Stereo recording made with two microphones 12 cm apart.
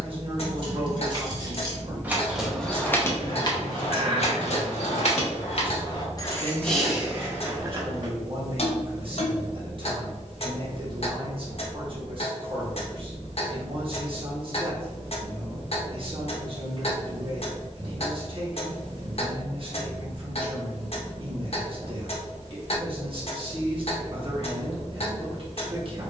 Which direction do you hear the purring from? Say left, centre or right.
right.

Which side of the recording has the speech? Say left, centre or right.
right.